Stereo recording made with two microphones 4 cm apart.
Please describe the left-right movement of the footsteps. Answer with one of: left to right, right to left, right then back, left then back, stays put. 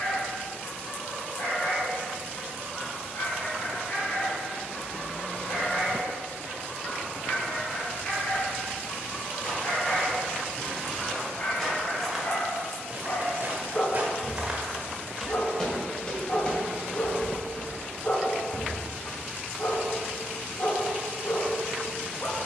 right then back.